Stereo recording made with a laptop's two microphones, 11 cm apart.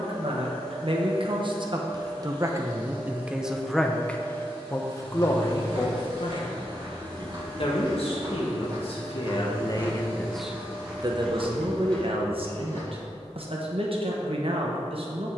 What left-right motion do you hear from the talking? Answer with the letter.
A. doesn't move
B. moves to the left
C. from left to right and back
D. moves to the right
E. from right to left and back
E.